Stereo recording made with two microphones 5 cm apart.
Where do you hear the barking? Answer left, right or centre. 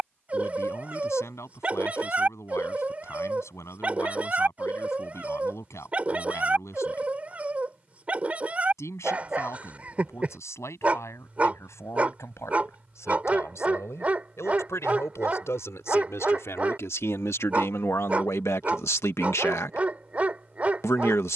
right.